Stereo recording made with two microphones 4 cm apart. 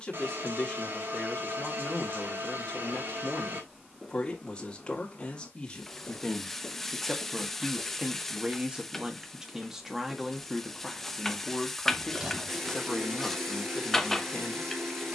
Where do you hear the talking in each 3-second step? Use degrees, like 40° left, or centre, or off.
20° left, 20° left, 10° right, centre, 20° left.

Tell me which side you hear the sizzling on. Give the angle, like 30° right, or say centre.
10° left.